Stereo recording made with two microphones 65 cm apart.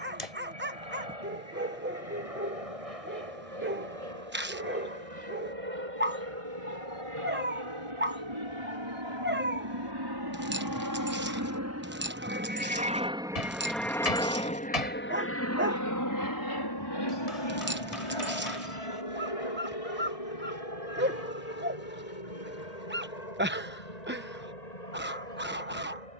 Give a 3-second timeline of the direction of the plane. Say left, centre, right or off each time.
right, right, right, right, centre, left, left, left, left.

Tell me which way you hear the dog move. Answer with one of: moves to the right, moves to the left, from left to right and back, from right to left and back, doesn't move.
doesn't move.